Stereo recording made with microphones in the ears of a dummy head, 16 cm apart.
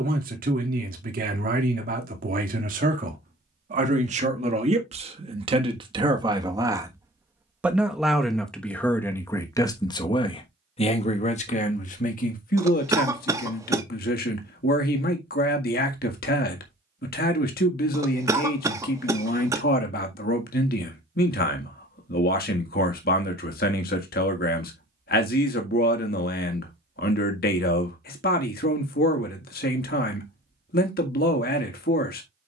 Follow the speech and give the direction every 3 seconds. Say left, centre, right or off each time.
right, right, centre, left, left, left, left, left, left, left, left.